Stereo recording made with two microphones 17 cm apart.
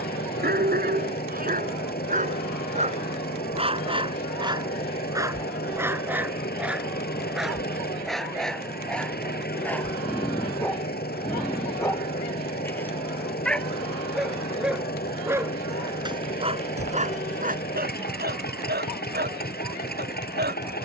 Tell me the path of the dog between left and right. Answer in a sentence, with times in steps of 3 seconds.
In this clip you hear the dog on the right from 0 s, in the centre from 6 s and on the right from 15 s.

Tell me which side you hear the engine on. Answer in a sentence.
You can hear the engine on the left.